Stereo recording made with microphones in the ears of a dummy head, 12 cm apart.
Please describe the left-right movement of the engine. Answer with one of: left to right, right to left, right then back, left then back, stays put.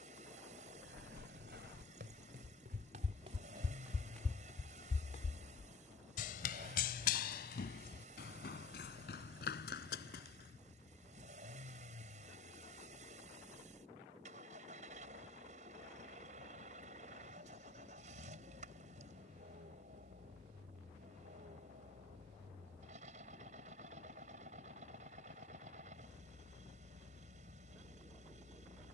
stays put.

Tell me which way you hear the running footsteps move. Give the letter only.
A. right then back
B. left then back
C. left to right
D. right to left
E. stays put
D.